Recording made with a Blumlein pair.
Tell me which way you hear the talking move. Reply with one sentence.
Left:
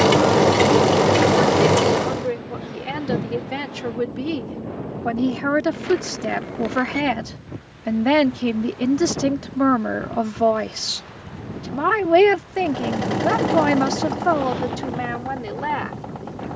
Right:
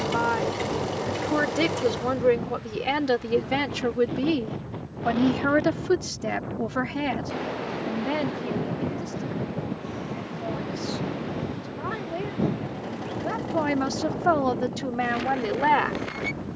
You can hear the talking move from right to left and back again.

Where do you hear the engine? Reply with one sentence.
In this clip you hear the engine on the left.